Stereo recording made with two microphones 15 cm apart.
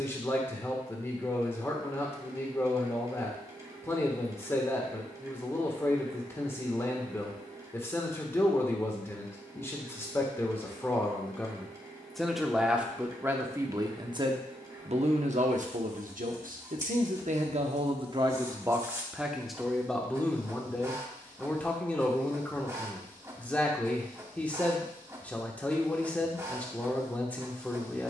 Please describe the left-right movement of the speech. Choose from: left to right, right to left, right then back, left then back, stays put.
right then back.